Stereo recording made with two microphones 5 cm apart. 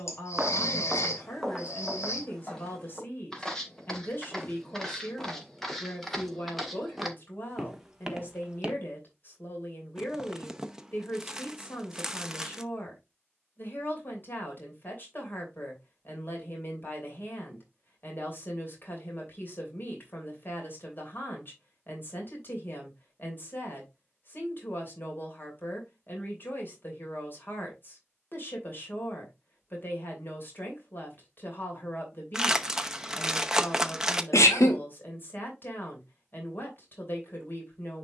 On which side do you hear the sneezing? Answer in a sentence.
You can hear the sneezing on the left.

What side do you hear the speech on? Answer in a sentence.
In this clip you hear the speech on the left.